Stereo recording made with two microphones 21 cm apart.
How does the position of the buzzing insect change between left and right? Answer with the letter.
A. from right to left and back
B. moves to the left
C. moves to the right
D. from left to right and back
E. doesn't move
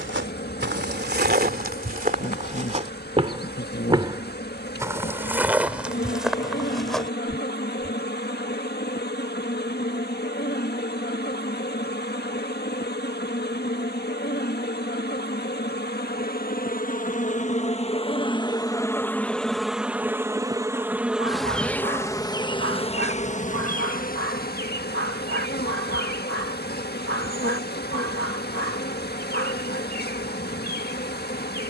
D.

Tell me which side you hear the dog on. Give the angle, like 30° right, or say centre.
80° right.